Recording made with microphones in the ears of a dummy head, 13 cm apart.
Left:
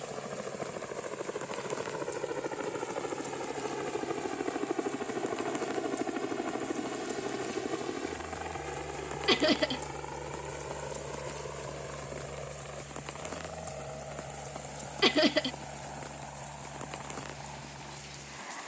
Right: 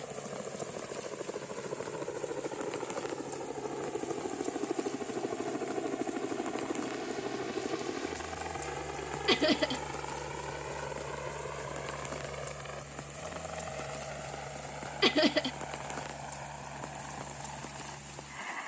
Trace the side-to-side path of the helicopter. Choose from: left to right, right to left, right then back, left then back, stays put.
left to right.